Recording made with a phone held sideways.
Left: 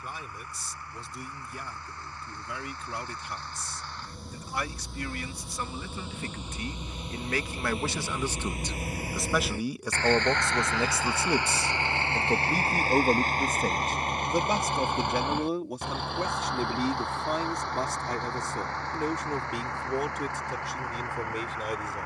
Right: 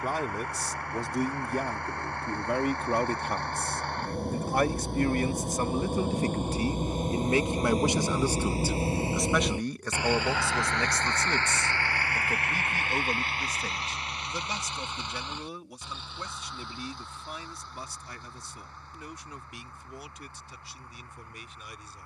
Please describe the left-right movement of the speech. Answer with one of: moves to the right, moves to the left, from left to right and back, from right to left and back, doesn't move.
moves to the left.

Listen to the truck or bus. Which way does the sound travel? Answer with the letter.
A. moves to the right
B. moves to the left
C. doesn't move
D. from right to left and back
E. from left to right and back
B.